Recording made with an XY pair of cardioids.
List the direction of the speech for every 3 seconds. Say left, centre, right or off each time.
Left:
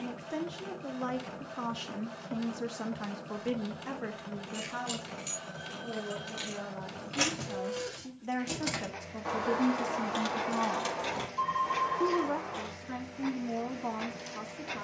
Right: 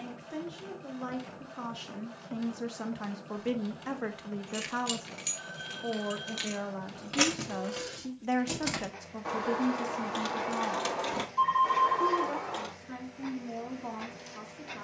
left, right, right, centre, left.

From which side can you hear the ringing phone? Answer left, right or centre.
right.